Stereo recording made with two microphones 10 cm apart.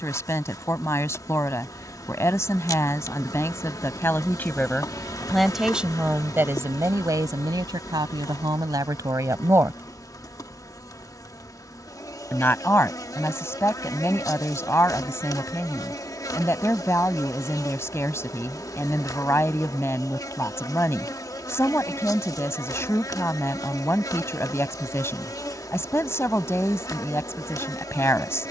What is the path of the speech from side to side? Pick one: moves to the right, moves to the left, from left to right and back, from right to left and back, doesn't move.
from left to right and back.